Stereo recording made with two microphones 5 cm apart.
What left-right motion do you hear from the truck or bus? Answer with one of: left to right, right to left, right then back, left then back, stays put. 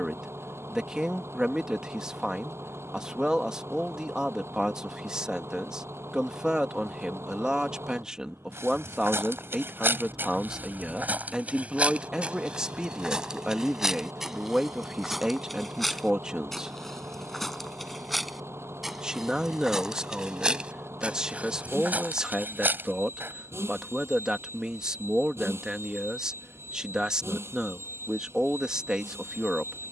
stays put.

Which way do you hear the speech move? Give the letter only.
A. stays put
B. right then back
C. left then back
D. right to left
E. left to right
A.